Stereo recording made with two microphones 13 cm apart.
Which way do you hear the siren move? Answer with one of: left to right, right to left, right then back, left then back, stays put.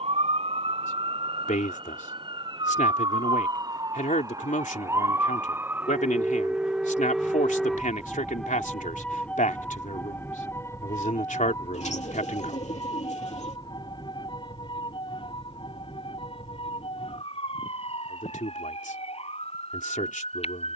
right to left.